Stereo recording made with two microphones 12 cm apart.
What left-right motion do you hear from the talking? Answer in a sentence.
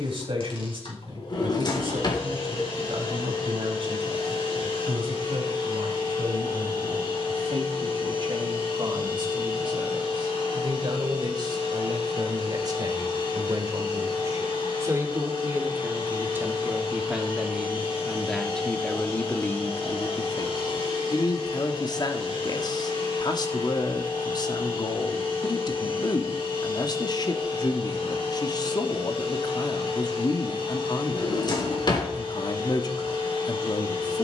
In this clip you hear the talking travel towards the left.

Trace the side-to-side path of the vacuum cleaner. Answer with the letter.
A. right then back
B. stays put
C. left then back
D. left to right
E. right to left
B.